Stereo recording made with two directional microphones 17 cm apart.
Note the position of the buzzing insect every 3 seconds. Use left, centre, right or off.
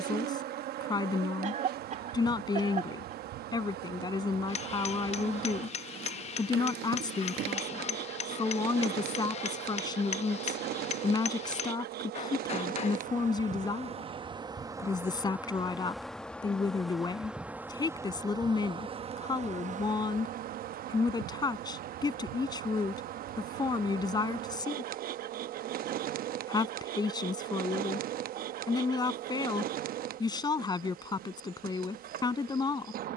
right, right, right, right, right, centre, right, right, right, right, right.